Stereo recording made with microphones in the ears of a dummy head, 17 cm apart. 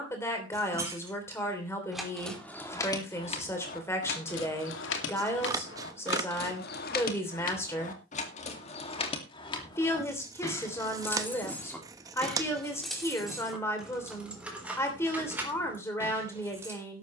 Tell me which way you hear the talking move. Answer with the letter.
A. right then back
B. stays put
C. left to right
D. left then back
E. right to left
B.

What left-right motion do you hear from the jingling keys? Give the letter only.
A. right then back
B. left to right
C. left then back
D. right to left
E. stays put
C.